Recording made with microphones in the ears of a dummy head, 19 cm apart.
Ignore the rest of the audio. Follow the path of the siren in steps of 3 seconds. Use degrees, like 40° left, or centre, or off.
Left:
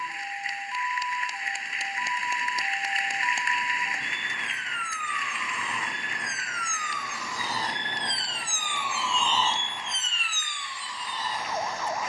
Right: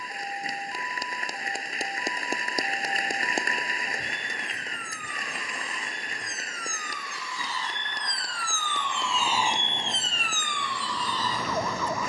60° left, 60° left, 30° left, 40° right.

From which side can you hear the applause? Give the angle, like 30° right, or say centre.
40° right.